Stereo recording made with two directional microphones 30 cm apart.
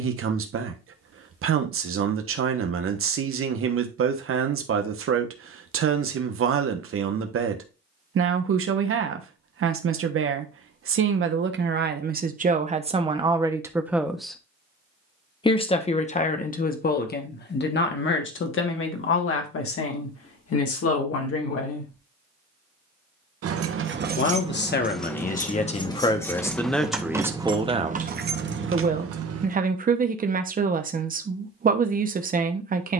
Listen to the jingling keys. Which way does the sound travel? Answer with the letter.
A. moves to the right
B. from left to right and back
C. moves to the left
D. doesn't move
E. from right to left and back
E.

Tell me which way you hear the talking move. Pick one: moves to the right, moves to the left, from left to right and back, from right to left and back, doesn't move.
from right to left and back.